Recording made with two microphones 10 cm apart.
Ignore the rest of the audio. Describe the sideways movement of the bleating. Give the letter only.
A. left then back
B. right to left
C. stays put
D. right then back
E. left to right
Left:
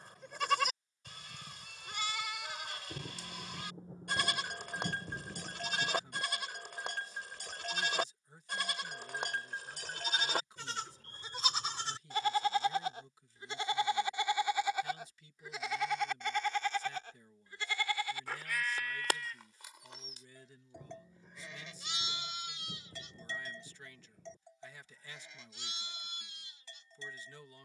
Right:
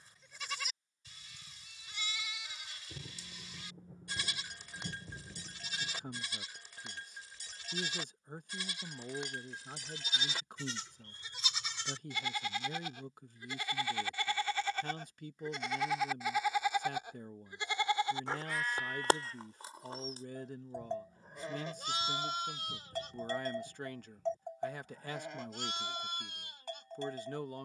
E.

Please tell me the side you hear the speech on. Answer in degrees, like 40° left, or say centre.
60° right.